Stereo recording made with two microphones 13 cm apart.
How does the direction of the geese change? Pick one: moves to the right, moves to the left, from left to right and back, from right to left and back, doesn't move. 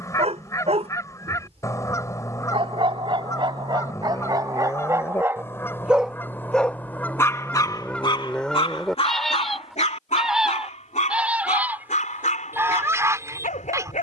moves to the right.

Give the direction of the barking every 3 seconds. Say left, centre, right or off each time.
right, right, left, left, left.